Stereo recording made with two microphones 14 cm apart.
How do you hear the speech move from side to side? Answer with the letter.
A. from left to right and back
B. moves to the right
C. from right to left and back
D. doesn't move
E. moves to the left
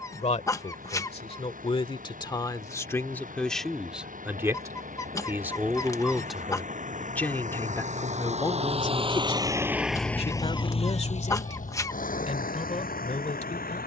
A.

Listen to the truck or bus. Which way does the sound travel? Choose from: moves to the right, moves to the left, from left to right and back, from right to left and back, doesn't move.
moves to the left.